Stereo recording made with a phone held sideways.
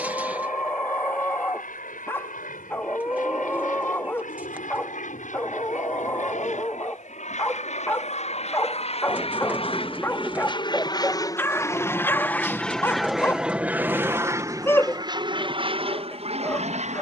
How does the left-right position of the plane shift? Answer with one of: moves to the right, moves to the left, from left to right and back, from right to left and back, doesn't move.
moves to the right.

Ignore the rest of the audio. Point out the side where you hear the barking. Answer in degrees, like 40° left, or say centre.
20° left.